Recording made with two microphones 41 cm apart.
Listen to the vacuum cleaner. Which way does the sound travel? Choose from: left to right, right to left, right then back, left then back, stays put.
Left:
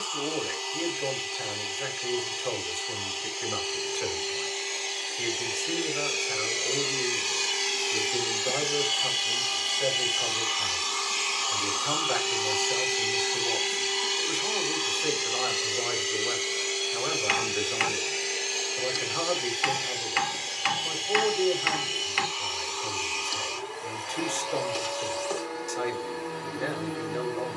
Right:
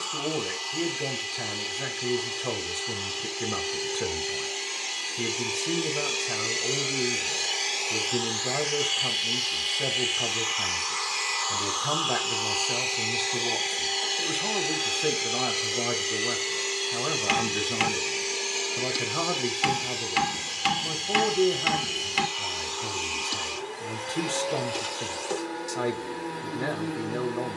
left then back.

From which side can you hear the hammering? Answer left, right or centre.
right.